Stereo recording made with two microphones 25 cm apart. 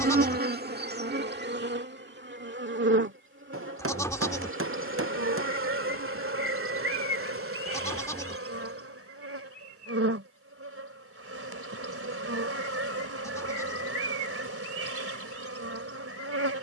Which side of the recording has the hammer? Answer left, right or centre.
right.